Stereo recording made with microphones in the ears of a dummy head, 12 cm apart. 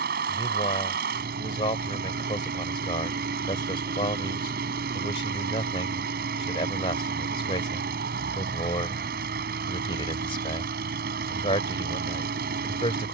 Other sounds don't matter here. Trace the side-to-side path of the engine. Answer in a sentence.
You can hear the engine stay in one place.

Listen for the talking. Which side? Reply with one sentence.
In this clip you hear the talking on the left.